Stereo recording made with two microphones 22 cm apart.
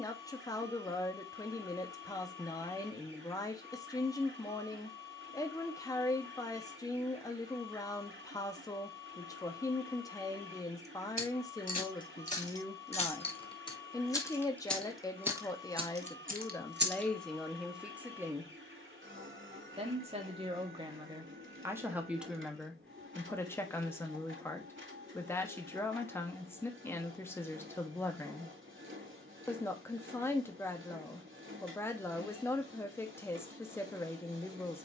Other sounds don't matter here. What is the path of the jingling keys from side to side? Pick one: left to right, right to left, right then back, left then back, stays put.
left to right.